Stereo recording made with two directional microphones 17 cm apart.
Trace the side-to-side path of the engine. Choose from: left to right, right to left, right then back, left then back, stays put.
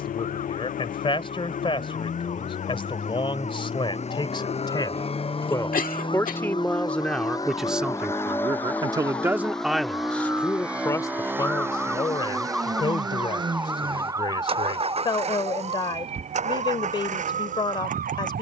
left to right.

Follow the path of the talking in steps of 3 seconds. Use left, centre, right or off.
left, left, centre, centre, left, left.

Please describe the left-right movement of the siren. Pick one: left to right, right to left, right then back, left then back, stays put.
left to right.